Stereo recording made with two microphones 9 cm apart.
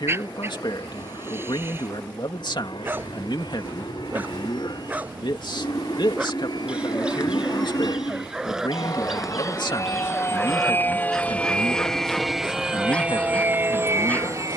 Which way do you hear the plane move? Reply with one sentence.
In this clip you hear the plane move from left to right.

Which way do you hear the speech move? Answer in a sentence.
You can hear the speech stay in one place.